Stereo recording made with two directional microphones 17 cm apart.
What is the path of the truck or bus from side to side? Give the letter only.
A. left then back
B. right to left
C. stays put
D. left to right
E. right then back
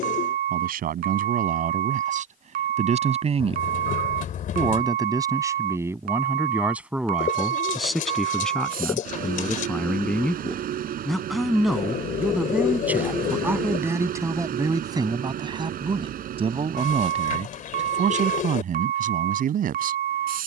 C.